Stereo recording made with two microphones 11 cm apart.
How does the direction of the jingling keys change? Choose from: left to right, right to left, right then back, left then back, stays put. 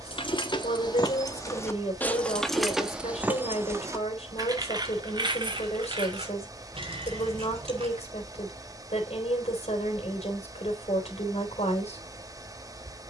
left to right.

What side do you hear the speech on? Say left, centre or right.
left.